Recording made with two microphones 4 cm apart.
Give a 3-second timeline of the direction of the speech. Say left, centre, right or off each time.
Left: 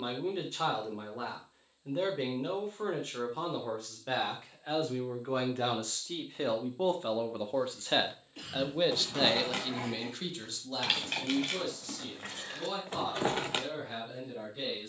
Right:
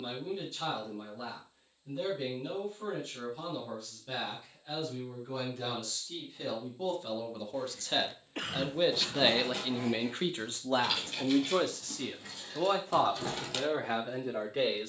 left, left, left, right, right.